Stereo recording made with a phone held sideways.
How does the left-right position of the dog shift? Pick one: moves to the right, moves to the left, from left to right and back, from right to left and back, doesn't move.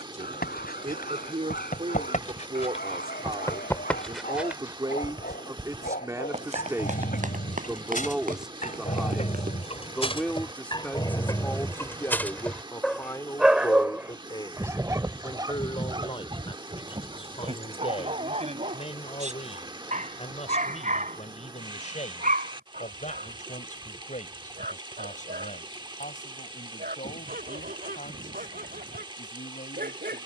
moves to the right.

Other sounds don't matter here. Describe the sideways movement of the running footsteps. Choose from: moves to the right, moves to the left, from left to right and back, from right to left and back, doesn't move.
moves to the right.